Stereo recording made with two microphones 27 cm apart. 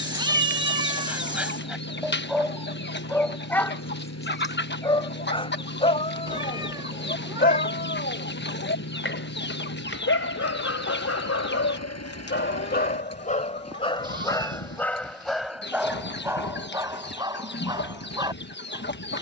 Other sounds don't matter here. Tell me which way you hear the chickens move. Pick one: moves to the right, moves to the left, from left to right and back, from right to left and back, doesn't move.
doesn't move.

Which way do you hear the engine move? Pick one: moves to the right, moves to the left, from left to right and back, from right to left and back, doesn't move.
doesn't move.